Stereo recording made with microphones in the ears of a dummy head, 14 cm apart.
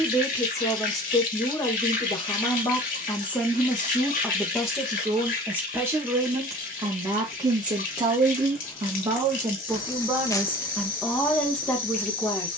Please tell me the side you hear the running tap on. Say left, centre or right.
left.